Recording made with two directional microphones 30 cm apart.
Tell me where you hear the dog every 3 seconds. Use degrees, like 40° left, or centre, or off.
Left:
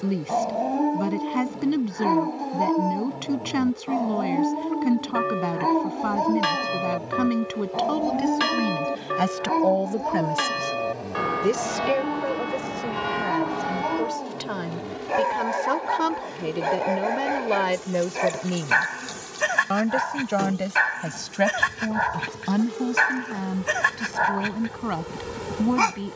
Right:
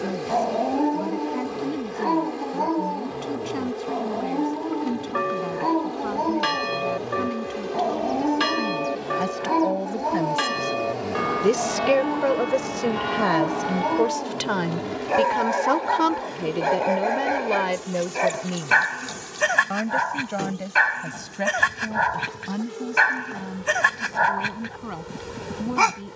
10° left, 20° left, centre, 10° right, 10° right, 10° right, 10° right, 10° right, 10° right.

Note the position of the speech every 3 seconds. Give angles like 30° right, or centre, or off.
50° left, 50° left, 50° left, 20° left, 50° right, 10° right, 30° left, 50° left, 50° left.